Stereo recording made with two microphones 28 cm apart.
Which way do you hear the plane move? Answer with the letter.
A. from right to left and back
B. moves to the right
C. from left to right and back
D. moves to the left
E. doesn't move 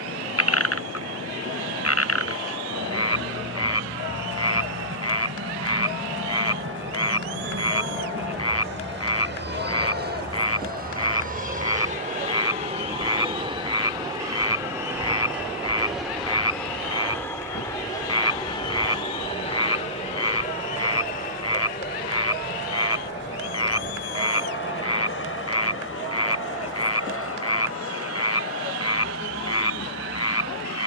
D.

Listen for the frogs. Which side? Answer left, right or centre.
left.